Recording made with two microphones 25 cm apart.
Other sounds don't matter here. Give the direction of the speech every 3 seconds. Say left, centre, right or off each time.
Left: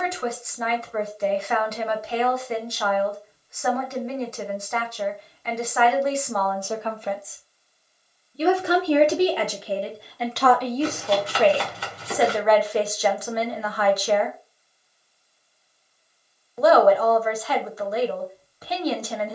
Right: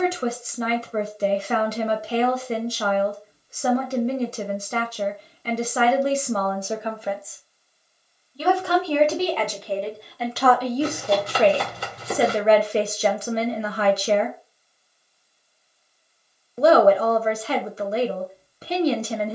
right, right, centre, centre, right, right, right.